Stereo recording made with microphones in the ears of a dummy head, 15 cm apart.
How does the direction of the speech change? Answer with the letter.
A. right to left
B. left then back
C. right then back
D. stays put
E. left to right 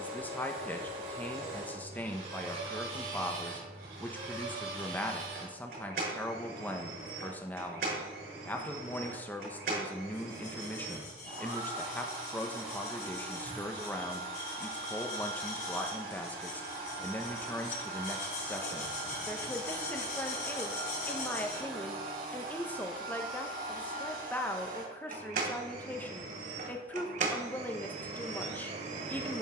D.